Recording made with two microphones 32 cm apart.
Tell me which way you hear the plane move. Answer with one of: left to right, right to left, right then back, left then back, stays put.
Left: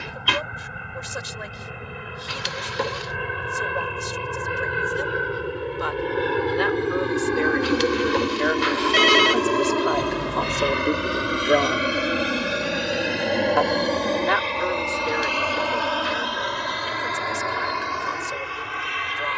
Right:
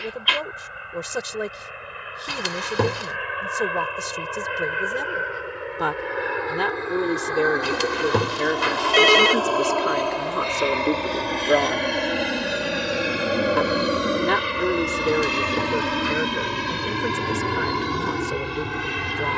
left to right.